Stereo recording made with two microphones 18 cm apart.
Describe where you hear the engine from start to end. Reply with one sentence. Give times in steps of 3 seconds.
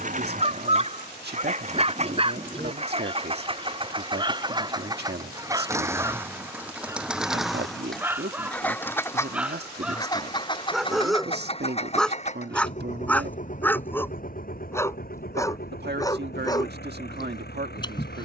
You can hear the engine on the right from 0 s, in the centre from 6 s and on the left from 9 s.